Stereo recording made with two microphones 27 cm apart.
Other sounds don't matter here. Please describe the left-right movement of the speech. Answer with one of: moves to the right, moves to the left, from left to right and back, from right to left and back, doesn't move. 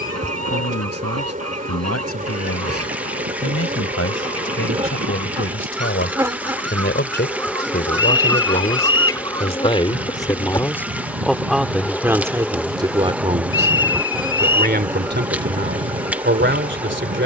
moves to the right.